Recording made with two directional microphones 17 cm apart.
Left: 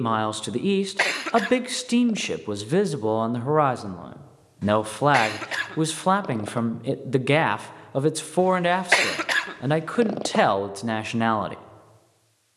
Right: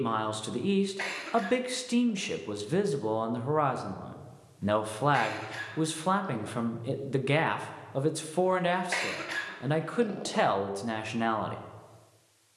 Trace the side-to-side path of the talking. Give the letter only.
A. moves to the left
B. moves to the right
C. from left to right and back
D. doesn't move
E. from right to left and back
D.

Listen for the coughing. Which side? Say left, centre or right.
left.